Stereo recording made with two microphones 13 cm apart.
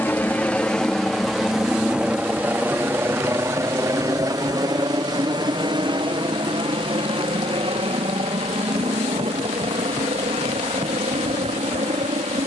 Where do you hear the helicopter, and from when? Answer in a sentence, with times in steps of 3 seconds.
You can hear the helicopter in the centre from 0 s and on the right from 3 s.